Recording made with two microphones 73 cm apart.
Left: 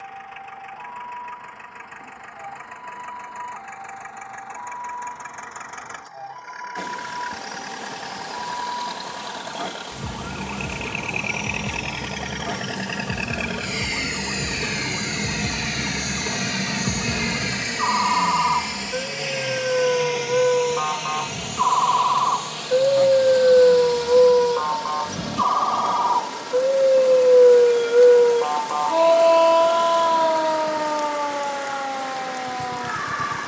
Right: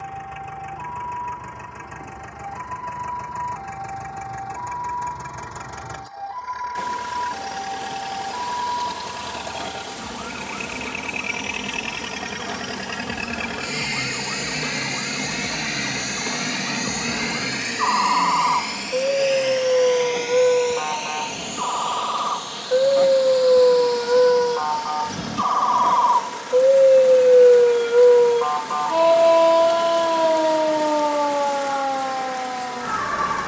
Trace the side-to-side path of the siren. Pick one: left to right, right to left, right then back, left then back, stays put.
left to right.